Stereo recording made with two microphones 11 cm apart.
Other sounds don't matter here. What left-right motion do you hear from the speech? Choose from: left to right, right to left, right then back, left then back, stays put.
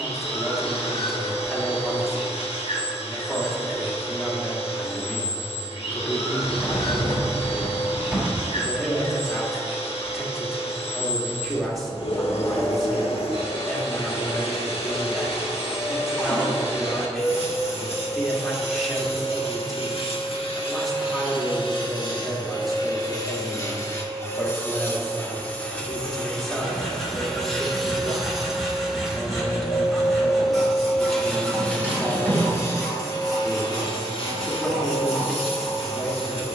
stays put.